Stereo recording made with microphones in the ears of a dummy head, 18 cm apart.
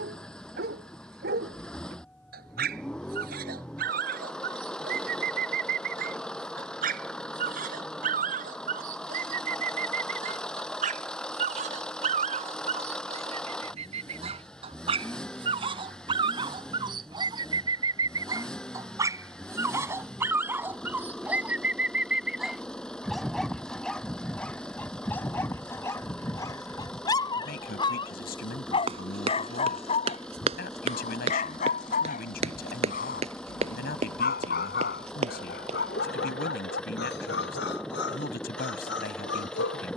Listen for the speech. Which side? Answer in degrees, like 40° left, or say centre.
50° left.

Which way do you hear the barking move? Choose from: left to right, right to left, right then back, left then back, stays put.
right to left.